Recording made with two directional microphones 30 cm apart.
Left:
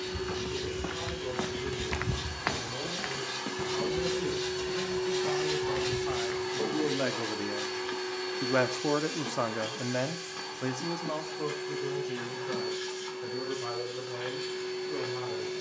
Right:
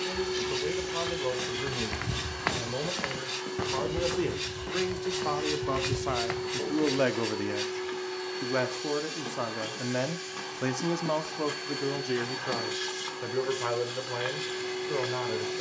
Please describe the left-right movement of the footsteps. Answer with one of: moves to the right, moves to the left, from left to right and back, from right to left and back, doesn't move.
moves to the right.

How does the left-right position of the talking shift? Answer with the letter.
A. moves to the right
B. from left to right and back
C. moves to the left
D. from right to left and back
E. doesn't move
D.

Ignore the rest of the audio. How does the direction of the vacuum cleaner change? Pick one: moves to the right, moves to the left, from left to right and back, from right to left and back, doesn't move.
from right to left and back.